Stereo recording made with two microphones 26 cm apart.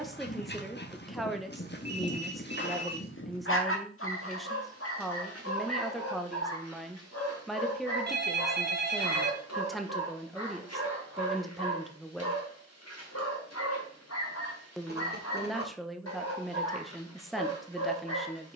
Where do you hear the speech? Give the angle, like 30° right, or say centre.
centre.